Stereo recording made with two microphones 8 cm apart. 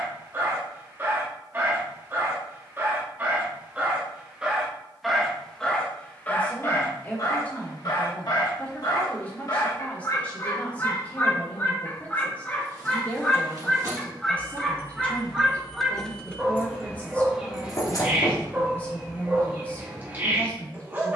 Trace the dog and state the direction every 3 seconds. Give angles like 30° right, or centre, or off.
20° right, 10° right, 50° left, 40° left, 10° left, 10° right, 20° right.